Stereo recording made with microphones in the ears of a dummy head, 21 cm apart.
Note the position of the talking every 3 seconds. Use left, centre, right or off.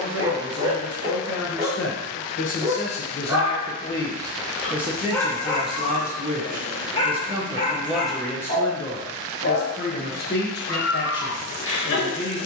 left, centre, centre, left.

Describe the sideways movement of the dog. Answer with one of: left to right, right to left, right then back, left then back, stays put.
right to left.